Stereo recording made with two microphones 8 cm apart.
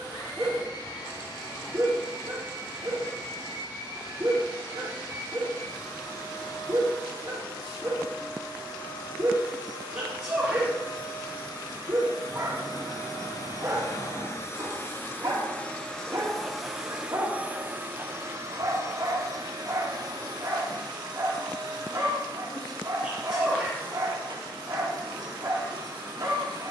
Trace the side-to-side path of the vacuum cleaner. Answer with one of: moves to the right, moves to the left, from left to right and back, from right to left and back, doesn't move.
moves to the right.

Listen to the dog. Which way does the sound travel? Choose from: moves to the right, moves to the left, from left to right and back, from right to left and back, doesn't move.
doesn't move.